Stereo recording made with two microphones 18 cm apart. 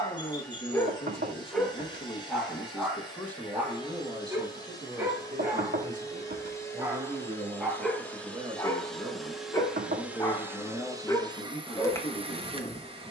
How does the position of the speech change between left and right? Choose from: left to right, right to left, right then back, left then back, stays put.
right then back.